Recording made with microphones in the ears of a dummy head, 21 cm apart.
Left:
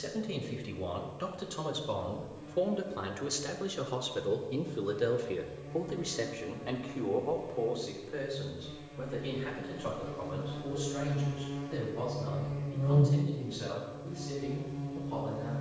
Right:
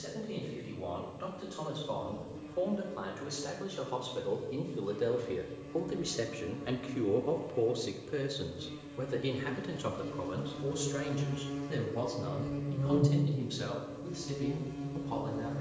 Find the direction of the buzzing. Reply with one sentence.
You can hear the buzzing on the right.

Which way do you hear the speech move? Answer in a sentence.
You can hear the speech move from left to right.